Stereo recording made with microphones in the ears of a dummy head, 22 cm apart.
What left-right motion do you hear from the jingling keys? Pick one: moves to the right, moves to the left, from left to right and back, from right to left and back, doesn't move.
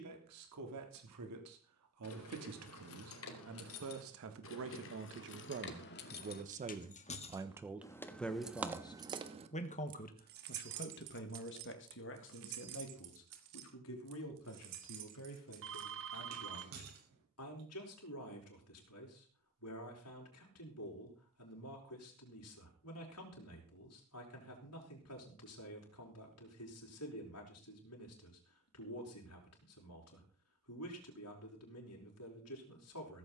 moves to the right.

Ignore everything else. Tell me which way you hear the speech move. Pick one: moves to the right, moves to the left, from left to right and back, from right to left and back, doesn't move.
moves to the left.